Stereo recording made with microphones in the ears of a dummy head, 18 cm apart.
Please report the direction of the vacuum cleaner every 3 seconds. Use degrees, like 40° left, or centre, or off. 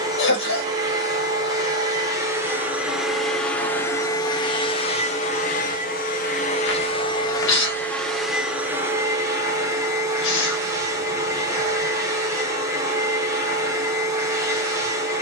20° right, 20° left, 20° left, 20° right, 20° right.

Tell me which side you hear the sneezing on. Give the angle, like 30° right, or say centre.
70° left.